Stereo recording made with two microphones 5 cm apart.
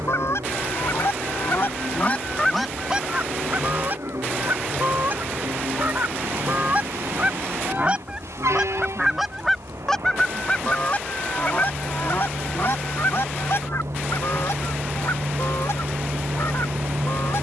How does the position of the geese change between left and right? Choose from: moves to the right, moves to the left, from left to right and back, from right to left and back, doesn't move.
from left to right and back.